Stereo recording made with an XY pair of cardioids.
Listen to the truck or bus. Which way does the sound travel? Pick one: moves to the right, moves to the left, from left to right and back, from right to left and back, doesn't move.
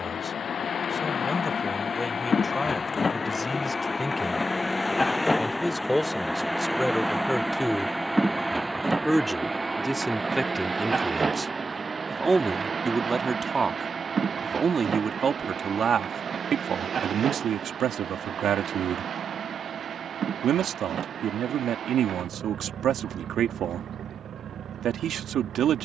moves to the right.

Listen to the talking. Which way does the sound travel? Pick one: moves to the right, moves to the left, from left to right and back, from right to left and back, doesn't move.
moves to the right.